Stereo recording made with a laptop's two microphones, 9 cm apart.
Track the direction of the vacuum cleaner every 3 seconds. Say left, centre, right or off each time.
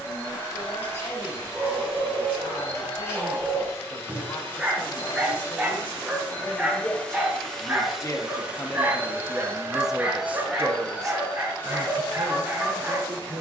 left, left, centre, centre, left.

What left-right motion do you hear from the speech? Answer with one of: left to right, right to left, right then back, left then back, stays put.
left to right.